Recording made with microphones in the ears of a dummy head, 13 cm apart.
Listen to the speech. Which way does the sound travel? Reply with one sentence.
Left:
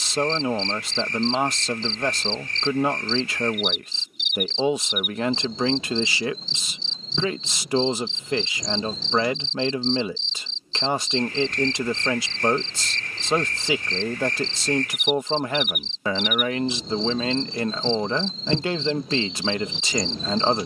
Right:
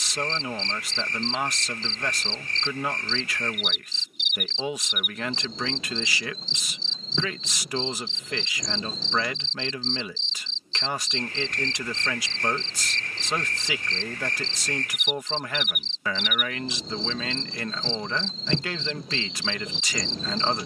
In this clip you hear the speech stay put.